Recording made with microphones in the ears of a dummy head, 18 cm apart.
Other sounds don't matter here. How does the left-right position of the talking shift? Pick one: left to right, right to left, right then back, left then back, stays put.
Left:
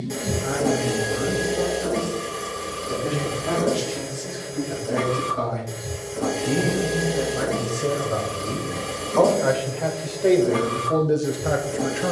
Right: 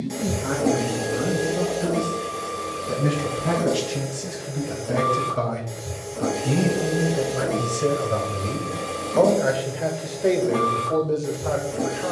right to left.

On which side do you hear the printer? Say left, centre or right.
centre.